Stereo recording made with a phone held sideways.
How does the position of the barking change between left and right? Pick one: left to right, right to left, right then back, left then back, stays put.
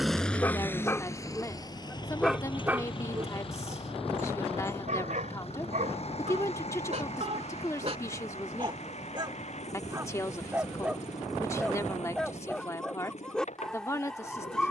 right then back.